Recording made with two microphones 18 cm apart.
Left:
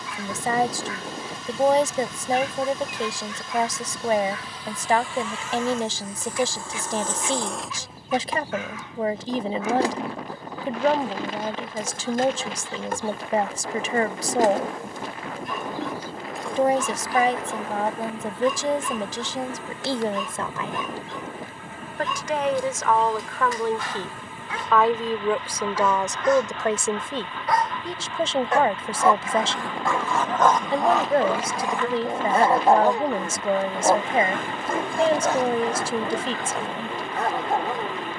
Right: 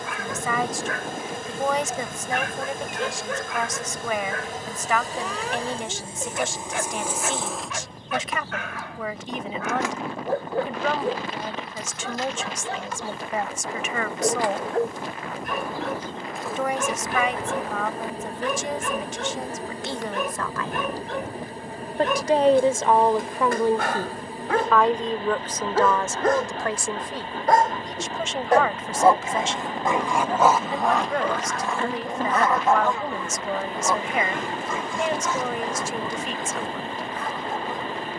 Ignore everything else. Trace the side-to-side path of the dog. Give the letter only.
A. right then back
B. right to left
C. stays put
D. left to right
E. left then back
B.